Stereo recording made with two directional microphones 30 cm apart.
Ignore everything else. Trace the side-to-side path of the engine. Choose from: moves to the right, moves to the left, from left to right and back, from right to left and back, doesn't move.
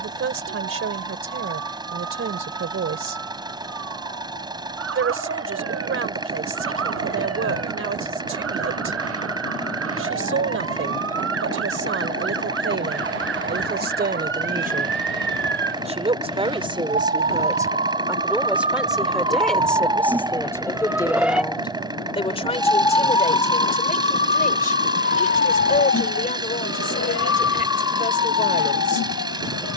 doesn't move.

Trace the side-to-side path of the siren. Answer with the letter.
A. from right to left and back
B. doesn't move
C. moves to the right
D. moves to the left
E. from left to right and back
D.